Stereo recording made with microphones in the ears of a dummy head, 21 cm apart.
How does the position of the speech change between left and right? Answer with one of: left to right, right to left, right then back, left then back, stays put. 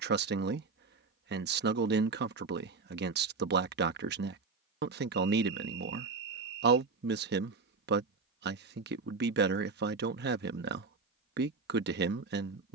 stays put.